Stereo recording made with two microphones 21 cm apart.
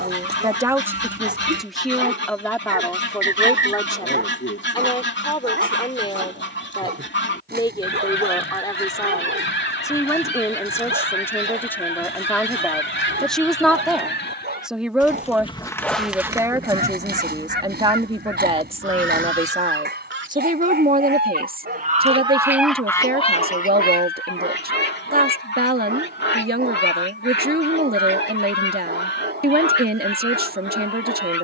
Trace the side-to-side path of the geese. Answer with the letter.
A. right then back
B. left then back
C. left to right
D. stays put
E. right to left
A.